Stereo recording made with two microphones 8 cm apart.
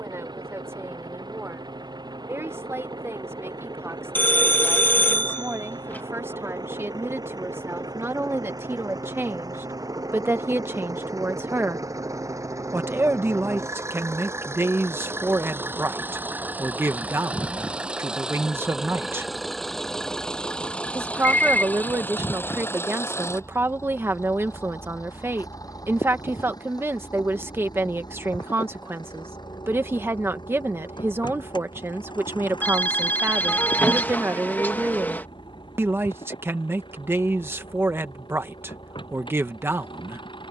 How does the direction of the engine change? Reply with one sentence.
In this clip you hear the engine move from right to left.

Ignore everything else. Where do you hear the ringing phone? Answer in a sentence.
You can hear the ringing phone on the left.